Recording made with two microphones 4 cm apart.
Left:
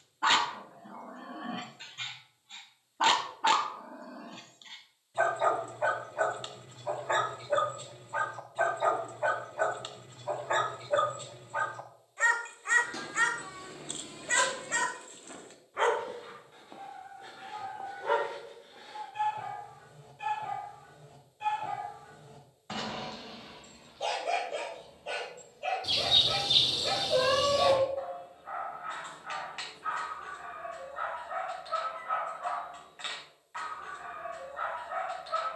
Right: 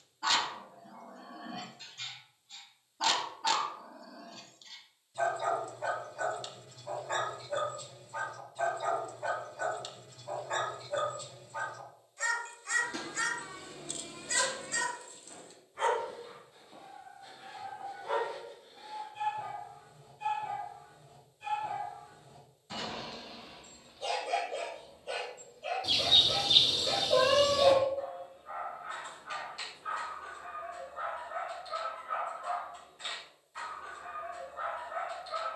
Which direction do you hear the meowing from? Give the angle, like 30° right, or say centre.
centre.